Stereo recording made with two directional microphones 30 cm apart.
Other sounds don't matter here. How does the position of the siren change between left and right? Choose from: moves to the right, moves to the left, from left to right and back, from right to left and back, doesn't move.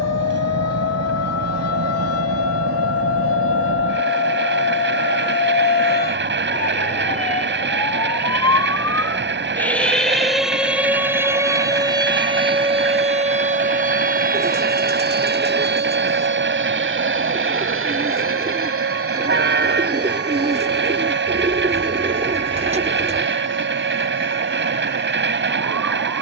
moves to the right.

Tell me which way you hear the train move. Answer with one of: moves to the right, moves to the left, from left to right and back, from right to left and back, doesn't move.
doesn't move.